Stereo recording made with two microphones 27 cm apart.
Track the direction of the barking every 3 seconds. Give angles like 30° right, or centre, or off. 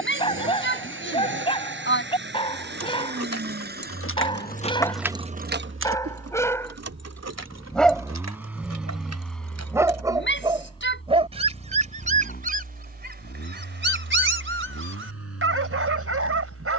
20° left, 20° left, centre, 20° right, 40° right, 60° right.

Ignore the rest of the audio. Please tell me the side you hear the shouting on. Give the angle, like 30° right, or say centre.
40° left.